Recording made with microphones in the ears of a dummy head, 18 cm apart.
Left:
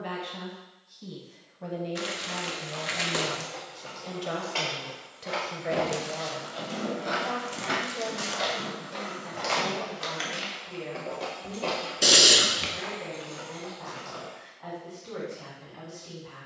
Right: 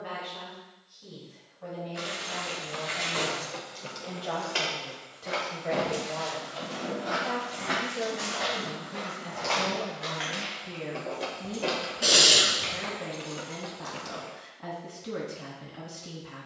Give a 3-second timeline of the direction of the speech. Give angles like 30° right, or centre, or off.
60° left, 30° left, 10° right, 40° right, 40° right, 40° right.